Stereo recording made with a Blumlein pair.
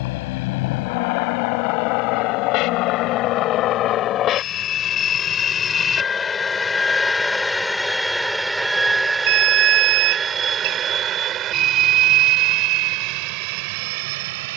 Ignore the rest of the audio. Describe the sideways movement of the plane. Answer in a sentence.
In this clip you hear the plane move from left to right.